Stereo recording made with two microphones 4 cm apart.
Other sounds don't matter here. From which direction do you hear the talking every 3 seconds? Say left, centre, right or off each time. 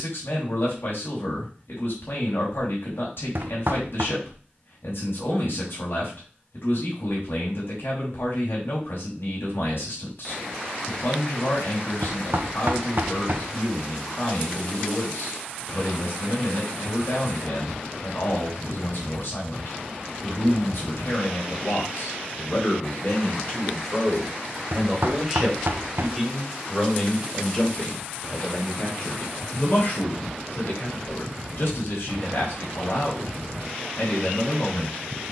left, left, left, left, left, left, left, left, centre, left, left, left.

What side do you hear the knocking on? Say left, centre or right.
right.